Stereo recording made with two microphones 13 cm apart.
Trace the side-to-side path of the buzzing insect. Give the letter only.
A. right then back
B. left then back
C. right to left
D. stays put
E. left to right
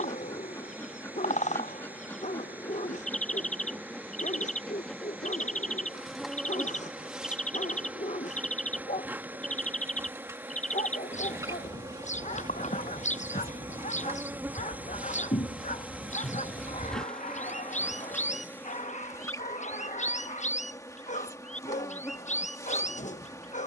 A.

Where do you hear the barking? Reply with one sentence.
You can hear the barking on the left.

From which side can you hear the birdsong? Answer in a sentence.
In this clip you hear the birdsong on the left.